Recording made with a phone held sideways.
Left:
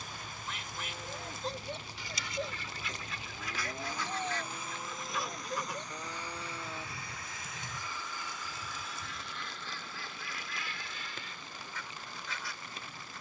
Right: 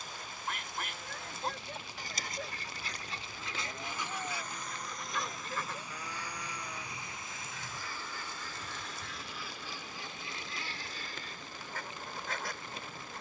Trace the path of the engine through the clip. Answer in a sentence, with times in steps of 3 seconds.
You can hear the engine on the left from 0 s, in the centre from 3 s and on the right from 6 s.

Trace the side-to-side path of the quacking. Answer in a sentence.
In this clip you hear the quacking move from right to left and back again.